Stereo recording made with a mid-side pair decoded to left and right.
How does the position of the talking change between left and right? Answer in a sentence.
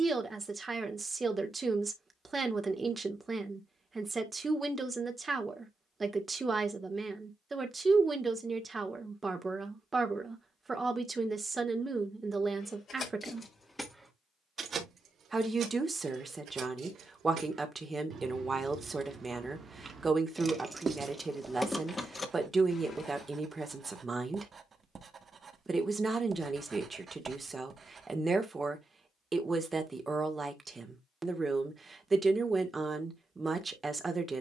In this clip you hear the talking stay in one place.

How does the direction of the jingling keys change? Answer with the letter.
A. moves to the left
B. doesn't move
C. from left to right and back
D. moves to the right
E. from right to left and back
C.